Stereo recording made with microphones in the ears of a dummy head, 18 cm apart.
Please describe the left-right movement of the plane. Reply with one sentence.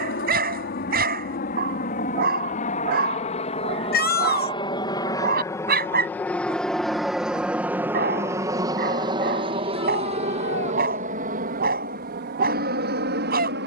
In this clip you hear the plane travel towards the right.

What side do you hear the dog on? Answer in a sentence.
You can hear the dog on the right.